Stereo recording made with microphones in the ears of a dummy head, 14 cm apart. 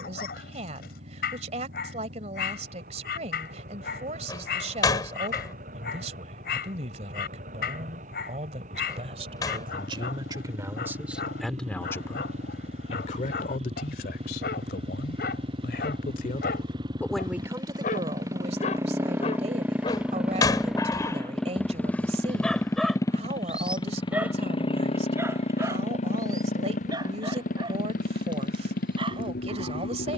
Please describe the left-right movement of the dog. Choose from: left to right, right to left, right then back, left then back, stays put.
left to right.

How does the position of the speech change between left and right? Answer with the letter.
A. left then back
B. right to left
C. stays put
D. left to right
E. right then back
A.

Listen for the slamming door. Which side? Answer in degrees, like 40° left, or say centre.
20° left.